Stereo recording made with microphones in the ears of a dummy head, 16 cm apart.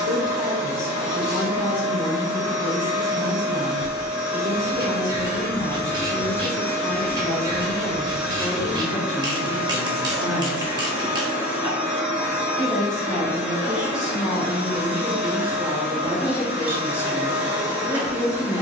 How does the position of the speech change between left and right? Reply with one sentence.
You can hear the speech go from the left side to the right.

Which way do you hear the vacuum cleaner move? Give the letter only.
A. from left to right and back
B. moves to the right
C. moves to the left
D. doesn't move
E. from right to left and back
B.